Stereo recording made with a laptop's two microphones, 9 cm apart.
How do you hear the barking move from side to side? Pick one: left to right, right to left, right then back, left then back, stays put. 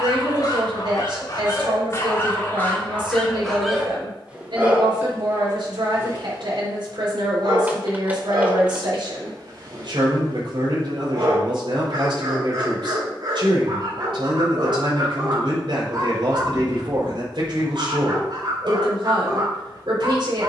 left to right.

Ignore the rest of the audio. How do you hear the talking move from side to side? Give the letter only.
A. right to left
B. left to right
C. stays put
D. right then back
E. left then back
C.